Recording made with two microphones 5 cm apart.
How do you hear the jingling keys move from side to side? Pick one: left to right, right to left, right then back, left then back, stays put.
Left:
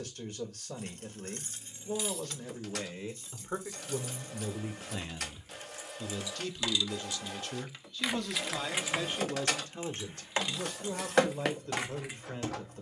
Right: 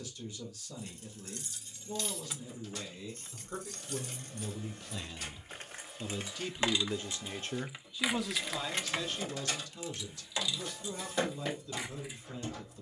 right then back.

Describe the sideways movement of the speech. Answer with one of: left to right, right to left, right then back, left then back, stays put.
right then back.